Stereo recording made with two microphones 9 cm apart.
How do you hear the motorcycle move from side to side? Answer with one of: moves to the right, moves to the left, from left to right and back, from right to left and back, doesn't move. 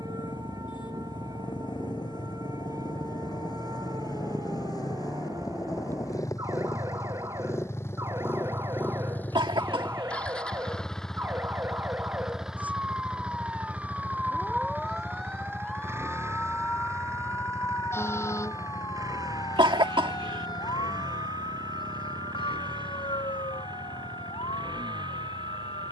moves to the right.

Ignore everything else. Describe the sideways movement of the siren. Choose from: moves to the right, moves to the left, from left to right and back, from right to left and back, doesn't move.
moves to the left.